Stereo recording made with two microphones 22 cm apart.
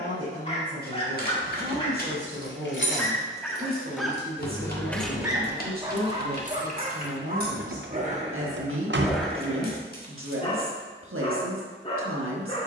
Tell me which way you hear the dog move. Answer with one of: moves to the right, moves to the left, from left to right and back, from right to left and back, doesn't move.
from left to right and back.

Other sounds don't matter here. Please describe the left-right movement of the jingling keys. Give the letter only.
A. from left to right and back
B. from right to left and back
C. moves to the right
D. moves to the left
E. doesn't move
C.